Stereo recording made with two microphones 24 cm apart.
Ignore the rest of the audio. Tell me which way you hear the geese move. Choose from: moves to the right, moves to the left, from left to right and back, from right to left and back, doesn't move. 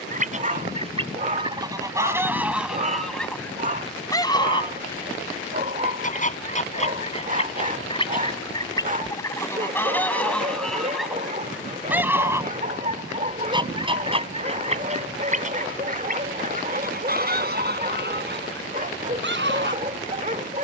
from right to left and back.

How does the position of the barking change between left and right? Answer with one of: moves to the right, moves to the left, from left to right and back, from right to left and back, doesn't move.
doesn't move.